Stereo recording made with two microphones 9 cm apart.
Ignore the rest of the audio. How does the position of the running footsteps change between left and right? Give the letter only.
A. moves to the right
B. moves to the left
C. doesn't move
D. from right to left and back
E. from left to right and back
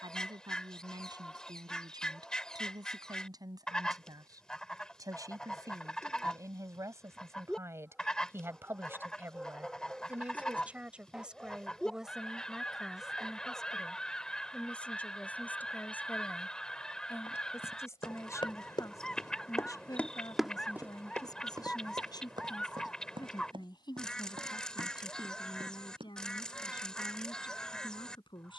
A.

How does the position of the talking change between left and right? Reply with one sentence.
You can hear the talking move to the left.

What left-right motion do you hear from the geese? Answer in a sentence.
In this clip you hear the geese stay in one place.